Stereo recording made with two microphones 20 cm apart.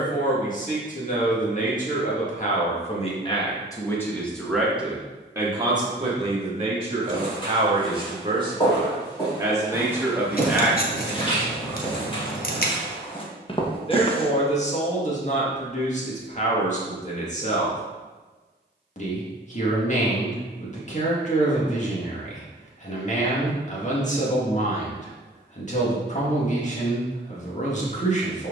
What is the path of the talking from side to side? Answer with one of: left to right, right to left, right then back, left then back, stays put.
right then back.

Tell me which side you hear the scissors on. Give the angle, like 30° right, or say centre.
50° left.